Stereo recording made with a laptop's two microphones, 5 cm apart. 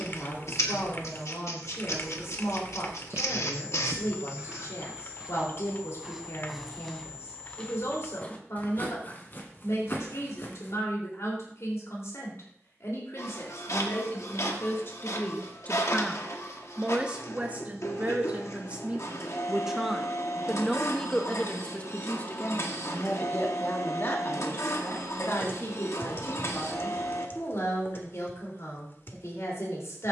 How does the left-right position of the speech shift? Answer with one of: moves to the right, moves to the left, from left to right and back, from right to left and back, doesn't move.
from left to right and back.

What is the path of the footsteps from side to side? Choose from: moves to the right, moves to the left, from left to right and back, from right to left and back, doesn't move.
moves to the left.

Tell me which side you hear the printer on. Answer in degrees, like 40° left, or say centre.
80° left.